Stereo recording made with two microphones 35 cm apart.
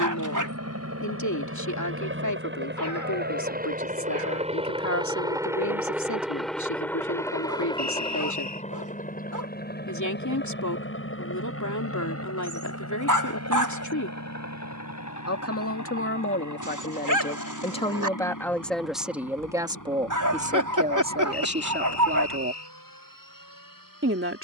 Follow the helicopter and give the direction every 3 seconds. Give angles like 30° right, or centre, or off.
40° right, 20° right, 10° left, 30° left, 50° left, 50° left, 60° left, 60° left.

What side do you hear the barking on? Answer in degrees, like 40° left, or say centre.
60° right.